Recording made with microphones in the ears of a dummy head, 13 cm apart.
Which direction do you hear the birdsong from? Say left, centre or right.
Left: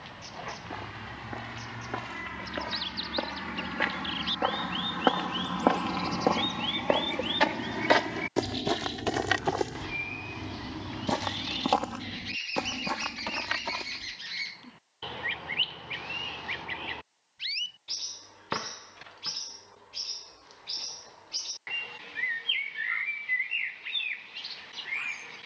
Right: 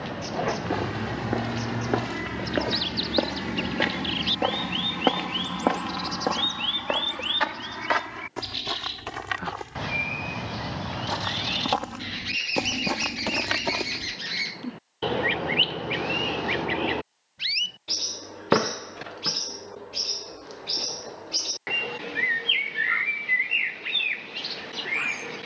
right.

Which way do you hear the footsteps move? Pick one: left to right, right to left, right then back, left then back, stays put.
left then back.